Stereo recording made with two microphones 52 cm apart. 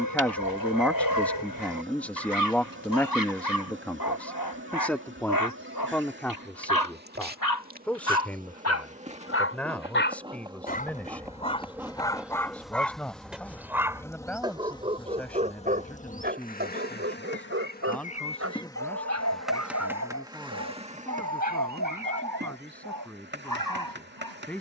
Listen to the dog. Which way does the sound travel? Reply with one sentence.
You can hear the dog move from left to right.